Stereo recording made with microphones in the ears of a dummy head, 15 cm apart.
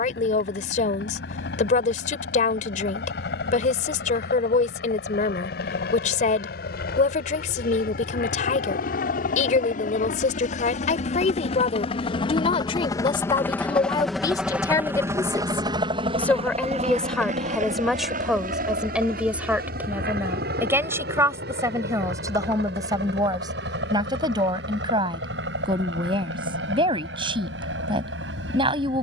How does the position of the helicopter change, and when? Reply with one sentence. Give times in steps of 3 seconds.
In this clip you hear the helicopter on the left from 0 s, in the centre from 12 s and on the right from 15 s.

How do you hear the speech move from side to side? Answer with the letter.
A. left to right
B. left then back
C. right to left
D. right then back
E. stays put
A.